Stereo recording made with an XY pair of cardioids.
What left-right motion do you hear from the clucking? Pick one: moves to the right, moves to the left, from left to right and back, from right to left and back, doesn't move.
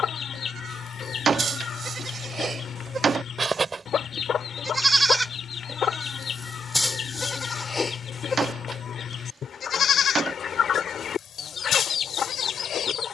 doesn't move.